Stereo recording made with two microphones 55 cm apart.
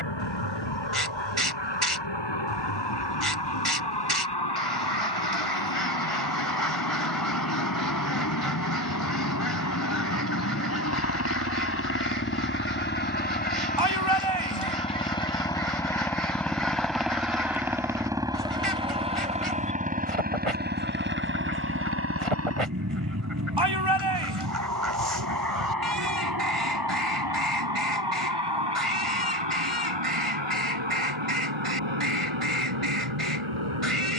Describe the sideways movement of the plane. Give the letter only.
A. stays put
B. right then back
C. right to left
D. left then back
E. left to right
E.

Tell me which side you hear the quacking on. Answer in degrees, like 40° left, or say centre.
70° right.